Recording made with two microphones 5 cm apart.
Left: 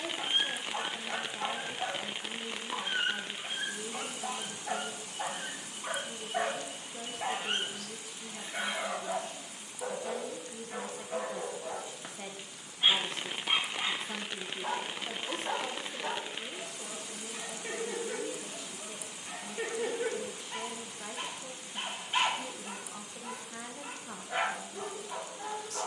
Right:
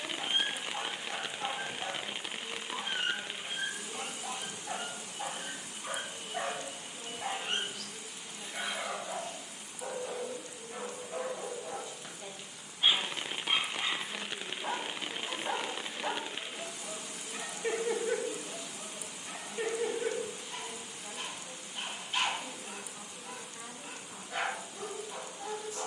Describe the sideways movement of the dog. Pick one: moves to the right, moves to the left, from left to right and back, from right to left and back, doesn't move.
from left to right and back.